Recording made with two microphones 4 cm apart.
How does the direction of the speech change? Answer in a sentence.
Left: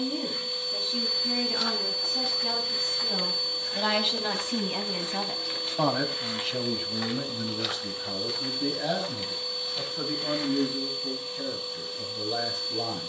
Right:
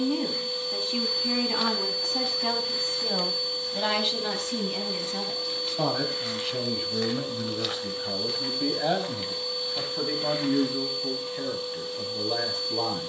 In this clip you hear the speech move from right to left and back again.